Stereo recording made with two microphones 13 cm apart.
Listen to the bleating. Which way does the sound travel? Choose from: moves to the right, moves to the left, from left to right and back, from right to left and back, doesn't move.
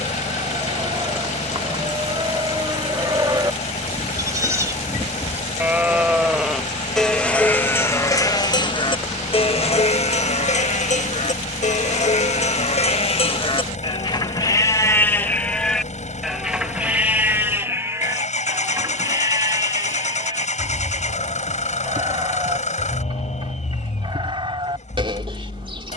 from right to left and back.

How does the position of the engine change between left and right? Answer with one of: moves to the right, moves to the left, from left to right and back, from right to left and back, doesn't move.
doesn't move.